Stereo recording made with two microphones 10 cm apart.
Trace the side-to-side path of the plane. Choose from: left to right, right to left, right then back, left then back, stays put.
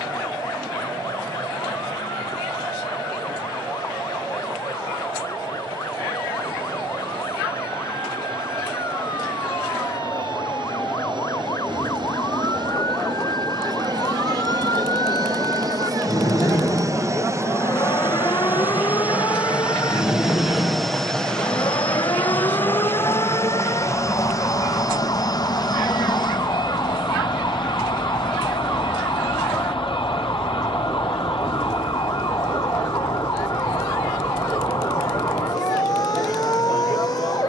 right to left.